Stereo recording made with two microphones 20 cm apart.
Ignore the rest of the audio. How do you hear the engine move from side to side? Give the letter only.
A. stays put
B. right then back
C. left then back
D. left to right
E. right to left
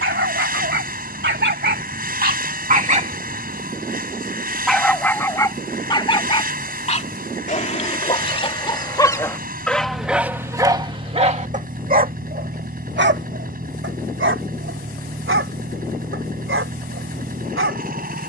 A.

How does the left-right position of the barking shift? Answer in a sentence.
You can hear the barking move from right to left and back again.